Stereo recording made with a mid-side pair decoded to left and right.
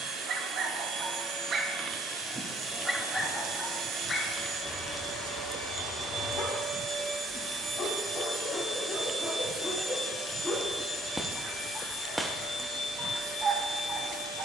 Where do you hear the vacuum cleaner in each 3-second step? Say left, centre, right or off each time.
right, right, right, left, left.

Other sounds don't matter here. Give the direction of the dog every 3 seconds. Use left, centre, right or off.
right, left, left, left, right.